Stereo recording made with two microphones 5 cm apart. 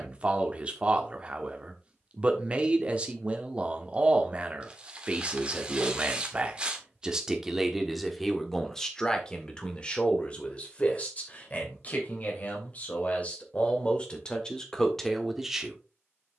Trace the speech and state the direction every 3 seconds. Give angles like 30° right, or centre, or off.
30° right, 30° right, 10° right, 30° left, 30° left, centre.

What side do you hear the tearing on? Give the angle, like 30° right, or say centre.
20° right.